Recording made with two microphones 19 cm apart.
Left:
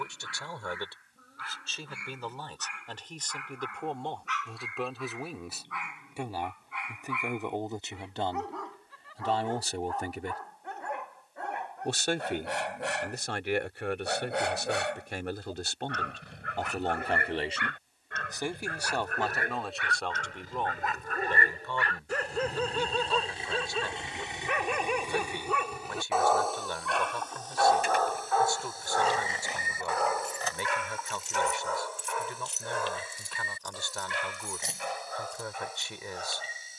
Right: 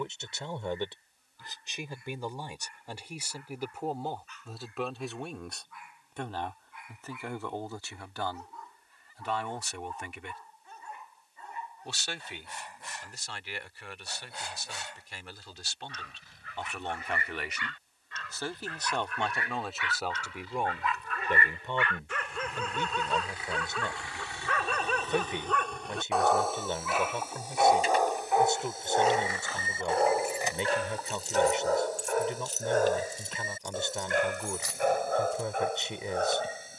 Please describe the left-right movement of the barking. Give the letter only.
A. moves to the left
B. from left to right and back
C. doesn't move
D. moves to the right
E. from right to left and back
D.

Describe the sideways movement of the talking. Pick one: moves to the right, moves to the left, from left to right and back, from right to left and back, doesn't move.
from right to left and back.